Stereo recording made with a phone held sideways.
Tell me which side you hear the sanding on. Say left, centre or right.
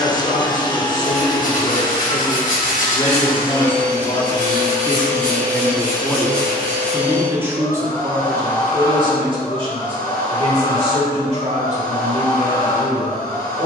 left.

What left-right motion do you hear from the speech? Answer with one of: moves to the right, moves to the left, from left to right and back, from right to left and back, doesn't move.
moves to the right.